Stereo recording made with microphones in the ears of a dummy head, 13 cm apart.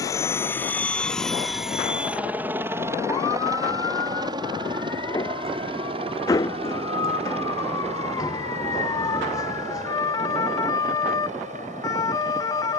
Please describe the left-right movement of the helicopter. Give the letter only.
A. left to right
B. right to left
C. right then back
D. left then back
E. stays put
A.